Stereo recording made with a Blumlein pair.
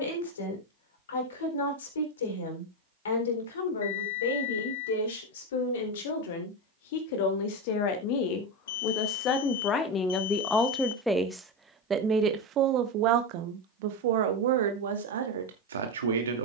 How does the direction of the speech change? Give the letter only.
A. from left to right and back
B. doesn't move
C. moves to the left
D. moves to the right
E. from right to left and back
D.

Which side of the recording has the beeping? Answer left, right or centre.
left.